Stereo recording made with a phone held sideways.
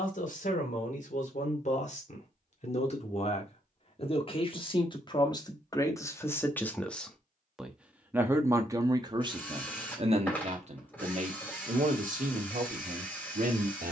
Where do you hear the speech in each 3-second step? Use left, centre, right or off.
left, left, centre, right, right.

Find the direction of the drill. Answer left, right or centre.
centre.